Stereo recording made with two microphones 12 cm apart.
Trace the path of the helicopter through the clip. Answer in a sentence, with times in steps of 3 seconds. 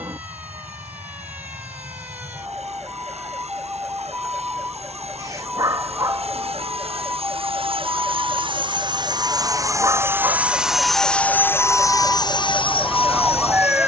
In this clip you hear the helicopter on the right from 0 s, in the centre from 9 s and on the left from 12 s.